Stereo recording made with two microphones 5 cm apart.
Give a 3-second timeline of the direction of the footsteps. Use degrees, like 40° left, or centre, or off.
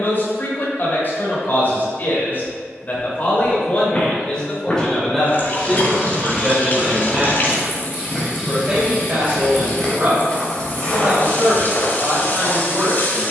off, 20° left, centre, 20° left, 40° left.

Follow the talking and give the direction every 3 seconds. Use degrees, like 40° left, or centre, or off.
40° left, 20° left, 10° right, 40° right, 50° right.